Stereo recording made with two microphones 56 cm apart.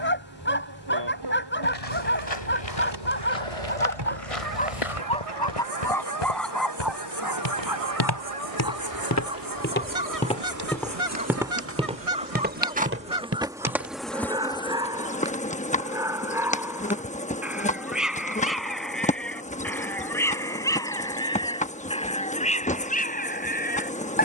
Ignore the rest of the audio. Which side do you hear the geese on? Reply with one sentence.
In this clip you hear the geese on the right.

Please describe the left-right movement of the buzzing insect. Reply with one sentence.
You can hear the buzzing insect move from right to left.